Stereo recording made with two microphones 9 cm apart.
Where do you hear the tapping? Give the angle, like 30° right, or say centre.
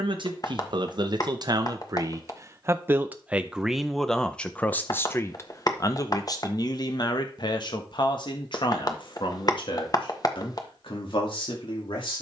40° left.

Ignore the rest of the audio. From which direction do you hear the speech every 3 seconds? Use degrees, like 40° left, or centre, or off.
50° right, 10° left, 50° left, 70° left.